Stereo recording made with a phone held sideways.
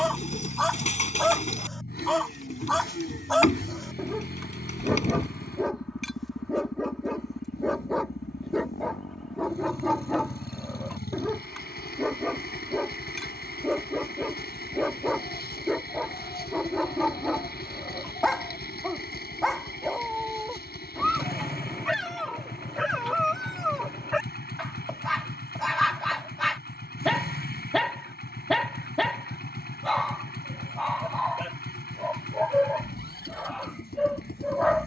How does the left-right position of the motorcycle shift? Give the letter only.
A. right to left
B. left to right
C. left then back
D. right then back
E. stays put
E.